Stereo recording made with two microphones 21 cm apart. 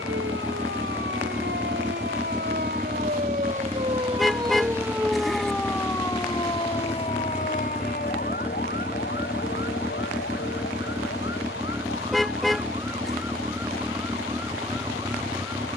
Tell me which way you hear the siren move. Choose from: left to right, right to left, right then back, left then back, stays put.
right to left.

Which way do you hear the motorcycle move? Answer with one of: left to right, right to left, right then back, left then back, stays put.
stays put.